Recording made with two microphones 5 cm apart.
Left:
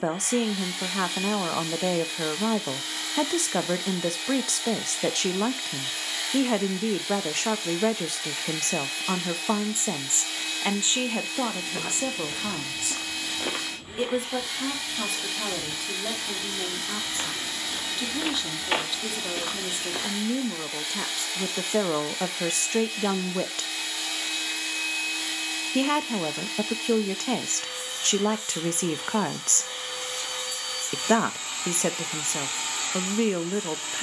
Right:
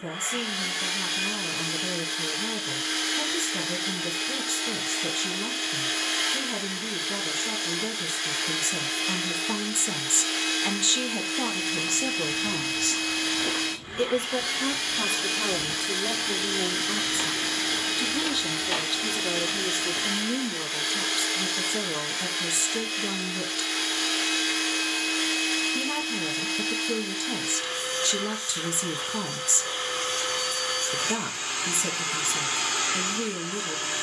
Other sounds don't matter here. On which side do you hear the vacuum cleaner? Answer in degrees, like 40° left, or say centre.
50° right.